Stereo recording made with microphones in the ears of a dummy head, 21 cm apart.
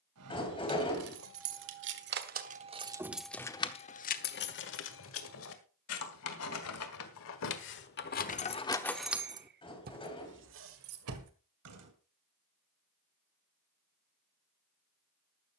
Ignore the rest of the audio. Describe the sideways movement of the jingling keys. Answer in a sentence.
In this clip you hear the jingling keys go left and come back.